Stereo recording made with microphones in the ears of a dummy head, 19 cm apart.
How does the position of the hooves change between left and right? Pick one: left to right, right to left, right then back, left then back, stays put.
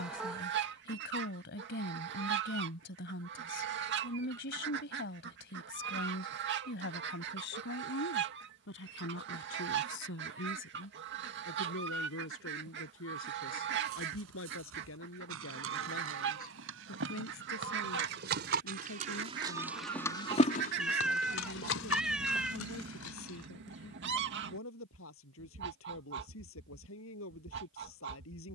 right to left.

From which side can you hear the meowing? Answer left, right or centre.
centre.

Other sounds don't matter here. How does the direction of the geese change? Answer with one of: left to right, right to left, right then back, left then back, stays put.
stays put.